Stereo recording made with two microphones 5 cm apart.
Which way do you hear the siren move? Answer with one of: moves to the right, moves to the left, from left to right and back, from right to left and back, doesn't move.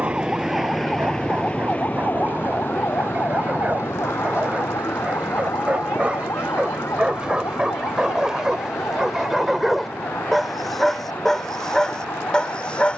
moves to the left.